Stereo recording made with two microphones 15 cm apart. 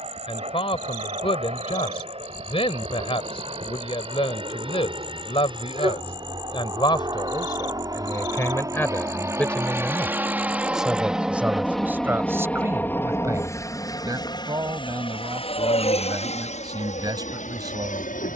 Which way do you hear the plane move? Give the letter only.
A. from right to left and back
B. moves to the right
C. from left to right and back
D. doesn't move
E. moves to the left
E.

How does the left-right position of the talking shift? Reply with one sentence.
You can hear the talking move to the right.